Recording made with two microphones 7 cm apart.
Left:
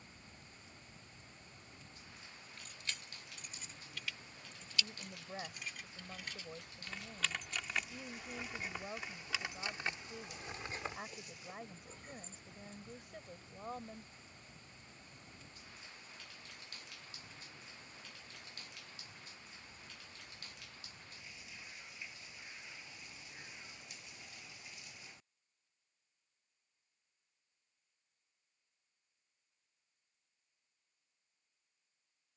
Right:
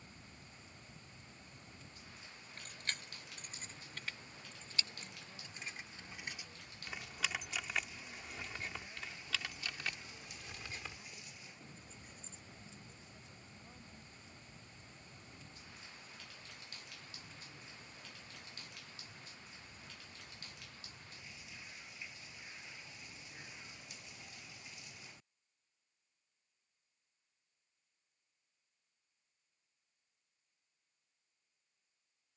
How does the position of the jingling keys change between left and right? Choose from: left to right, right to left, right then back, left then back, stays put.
right to left.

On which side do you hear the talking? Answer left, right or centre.
left.